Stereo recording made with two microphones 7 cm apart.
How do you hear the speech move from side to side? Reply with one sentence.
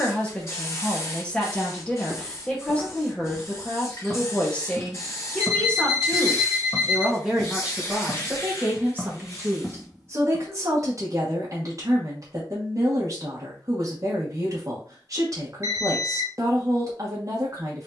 In this clip you hear the speech move from left to right.